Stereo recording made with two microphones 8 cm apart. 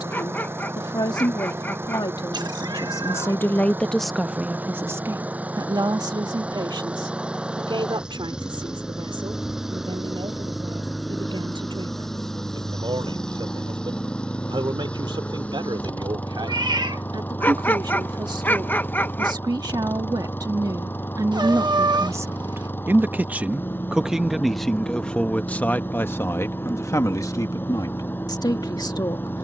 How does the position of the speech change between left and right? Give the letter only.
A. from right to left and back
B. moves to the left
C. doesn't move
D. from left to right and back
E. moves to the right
D.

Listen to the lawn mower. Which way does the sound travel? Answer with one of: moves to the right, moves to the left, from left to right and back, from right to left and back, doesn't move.
moves to the left.